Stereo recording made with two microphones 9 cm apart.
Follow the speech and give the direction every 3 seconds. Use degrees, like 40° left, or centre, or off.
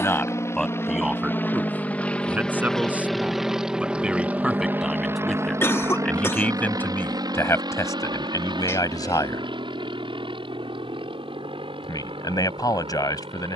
10° right, 10° right, 30° left, 50° left, 50° left.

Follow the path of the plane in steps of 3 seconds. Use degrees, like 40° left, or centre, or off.
20° left, 20° right, 50° right, 60° right, 70° right.